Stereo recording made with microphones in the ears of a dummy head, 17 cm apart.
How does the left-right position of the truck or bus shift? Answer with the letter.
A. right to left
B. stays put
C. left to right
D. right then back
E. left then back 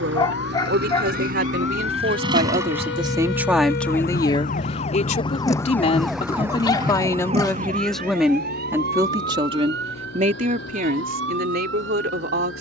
A.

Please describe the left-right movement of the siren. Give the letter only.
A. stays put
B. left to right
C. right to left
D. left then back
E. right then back
B.